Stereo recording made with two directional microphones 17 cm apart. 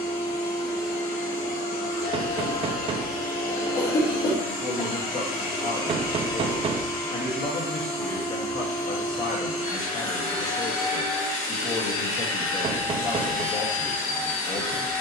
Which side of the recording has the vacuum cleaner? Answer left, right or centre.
left.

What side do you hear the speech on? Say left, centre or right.
left.